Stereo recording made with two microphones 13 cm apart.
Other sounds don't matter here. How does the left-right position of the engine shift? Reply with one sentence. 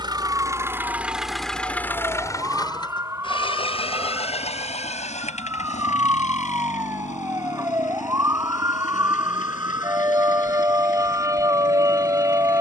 In this clip you hear the engine go from the right side to the left.